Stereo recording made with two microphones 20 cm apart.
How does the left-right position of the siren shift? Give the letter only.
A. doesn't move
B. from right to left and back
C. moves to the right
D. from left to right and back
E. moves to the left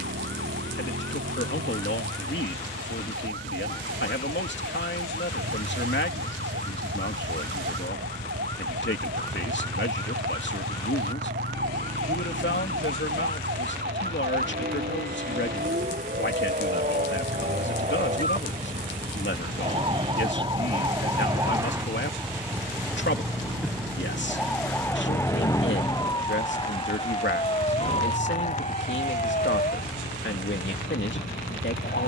E.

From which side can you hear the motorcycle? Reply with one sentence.
You can hear the motorcycle on the right.